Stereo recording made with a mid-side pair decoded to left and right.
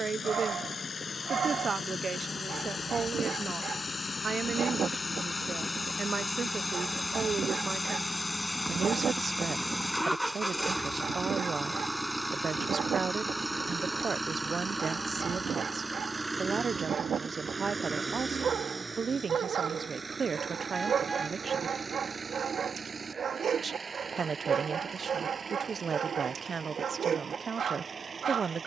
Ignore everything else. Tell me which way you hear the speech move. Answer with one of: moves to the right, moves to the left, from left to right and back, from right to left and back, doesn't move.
doesn't move.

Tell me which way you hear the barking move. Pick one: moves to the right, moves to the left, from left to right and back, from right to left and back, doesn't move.
doesn't move.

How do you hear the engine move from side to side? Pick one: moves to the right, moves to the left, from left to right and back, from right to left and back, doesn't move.
moves to the right.